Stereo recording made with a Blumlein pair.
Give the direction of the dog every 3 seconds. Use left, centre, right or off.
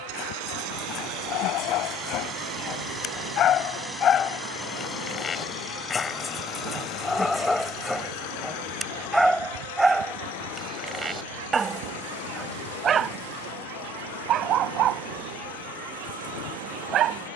left, left, centre, centre, right, right.